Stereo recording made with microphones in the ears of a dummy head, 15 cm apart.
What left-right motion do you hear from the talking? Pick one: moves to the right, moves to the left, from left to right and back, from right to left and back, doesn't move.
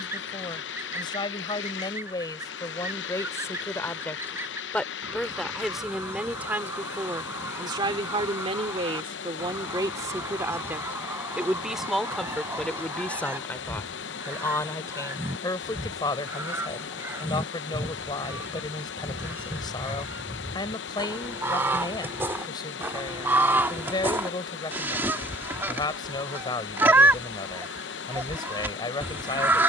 from left to right and back.